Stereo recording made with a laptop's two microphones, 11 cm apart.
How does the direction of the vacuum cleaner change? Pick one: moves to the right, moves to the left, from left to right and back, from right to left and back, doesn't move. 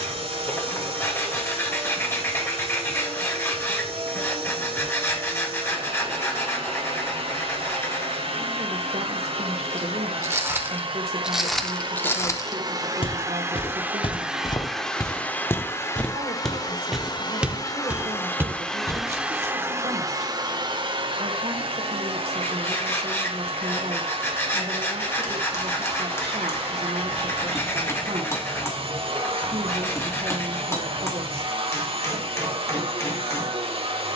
from right to left and back.